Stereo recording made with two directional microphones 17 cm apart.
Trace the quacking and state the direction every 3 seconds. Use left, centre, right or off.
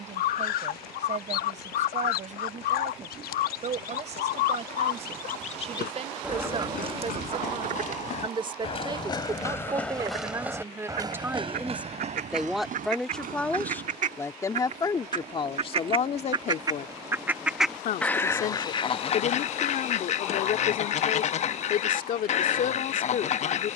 left, left, right, right, right, right, left, left.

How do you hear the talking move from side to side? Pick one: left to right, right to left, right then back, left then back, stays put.
right to left.